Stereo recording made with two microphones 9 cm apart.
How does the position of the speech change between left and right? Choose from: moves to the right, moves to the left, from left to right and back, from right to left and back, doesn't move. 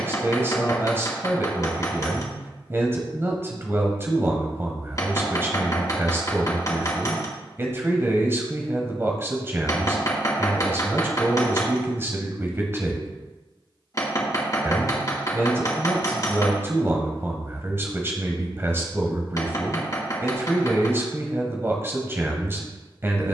doesn't move.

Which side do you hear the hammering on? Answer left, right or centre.
left.